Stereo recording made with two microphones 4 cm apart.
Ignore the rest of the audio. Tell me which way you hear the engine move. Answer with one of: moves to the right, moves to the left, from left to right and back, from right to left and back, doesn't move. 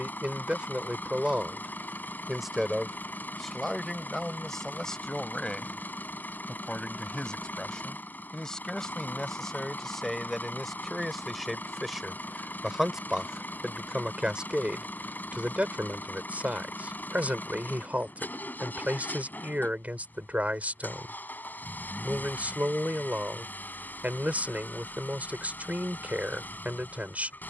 doesn't move.